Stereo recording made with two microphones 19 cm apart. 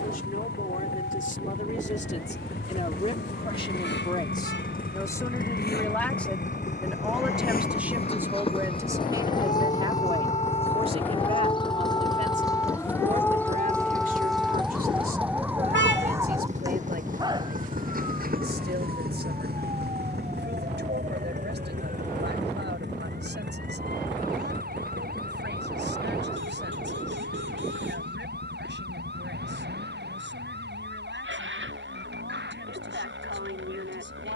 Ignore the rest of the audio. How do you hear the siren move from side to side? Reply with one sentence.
In this clip you hear the siren travel towards the right.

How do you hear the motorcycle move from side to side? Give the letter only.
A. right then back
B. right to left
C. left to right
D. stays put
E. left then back
C.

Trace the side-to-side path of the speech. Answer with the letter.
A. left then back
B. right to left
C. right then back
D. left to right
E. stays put
D.